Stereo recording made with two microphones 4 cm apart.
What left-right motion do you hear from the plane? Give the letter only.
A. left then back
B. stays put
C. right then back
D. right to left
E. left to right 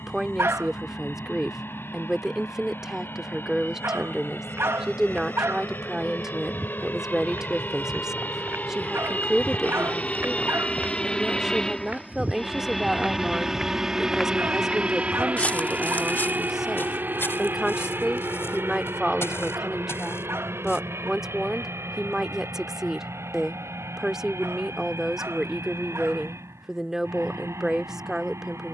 E.